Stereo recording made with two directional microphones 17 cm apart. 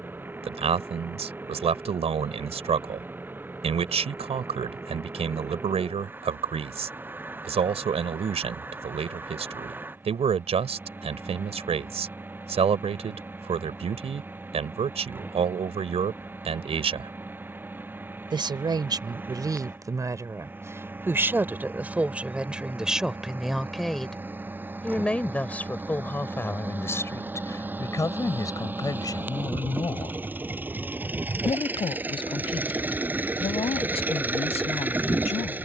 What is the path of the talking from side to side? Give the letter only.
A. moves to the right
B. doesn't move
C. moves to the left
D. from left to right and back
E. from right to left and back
C.